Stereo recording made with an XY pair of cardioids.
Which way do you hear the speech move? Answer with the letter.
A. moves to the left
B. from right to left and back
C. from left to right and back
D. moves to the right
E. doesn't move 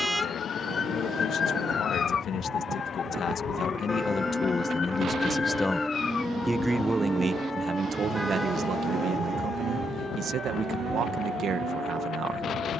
D.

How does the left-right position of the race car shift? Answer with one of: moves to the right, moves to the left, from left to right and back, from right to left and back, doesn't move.
moves to the right.